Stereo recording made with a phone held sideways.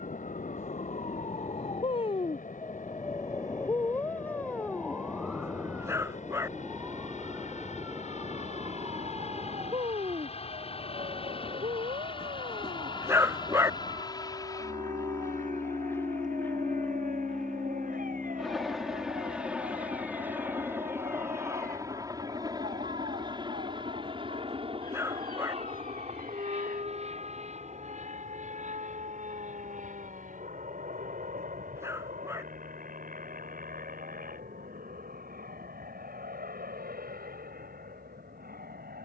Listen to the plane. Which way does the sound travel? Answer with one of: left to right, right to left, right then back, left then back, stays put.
left to right.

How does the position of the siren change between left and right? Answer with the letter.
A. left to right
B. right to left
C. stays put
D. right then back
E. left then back
A.